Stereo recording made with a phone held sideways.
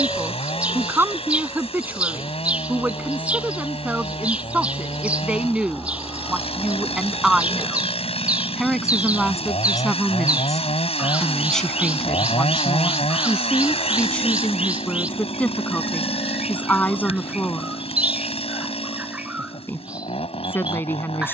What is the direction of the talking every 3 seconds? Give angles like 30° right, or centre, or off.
20° right, 10° right, centre, centre, 10° left, 10° left, 20° left.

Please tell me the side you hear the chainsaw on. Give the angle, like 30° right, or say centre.
50° left.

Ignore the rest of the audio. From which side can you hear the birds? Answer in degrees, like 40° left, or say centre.
10° right.